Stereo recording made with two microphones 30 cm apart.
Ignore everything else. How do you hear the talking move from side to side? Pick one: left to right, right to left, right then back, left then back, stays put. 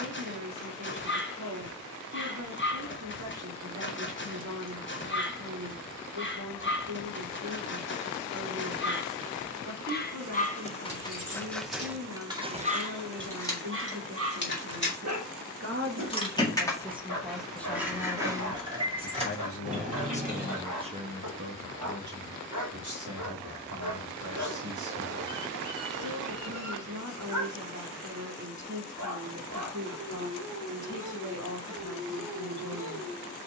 left then back.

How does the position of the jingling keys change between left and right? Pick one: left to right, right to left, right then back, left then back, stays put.
left then back.